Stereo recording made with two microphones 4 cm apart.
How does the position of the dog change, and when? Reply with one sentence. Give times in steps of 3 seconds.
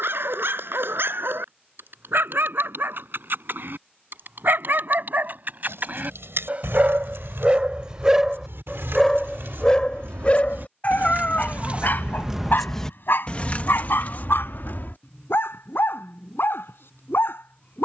In this clip you hear the dog on the right from 0 s and on the left from 9 s.